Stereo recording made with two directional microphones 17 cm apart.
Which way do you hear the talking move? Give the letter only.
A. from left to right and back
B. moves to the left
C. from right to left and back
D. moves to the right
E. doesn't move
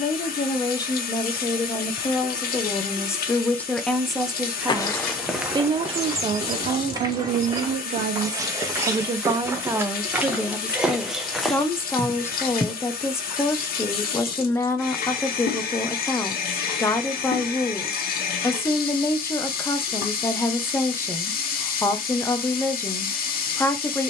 A.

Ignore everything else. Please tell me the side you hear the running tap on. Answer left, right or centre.
left.